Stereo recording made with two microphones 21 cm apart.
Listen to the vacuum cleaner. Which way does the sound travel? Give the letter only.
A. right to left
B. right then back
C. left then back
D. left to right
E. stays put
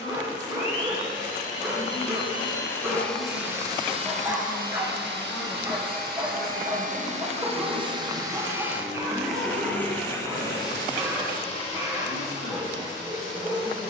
B.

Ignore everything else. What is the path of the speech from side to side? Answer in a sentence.
You can hear the speech move to the right.